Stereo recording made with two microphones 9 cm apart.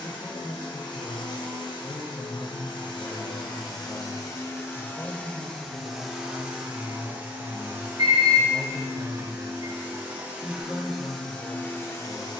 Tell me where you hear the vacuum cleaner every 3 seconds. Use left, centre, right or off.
left, left, right, centre.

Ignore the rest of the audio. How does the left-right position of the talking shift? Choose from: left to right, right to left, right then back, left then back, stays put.
stays put.